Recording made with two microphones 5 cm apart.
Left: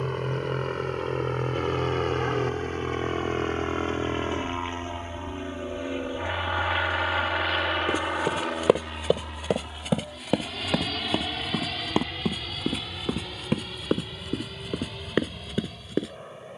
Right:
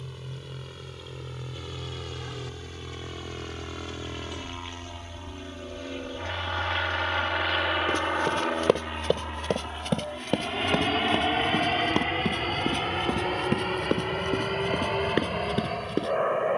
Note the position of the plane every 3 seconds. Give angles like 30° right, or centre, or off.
50° left, 30° left, centre, 30° right, 40° right, 50° right.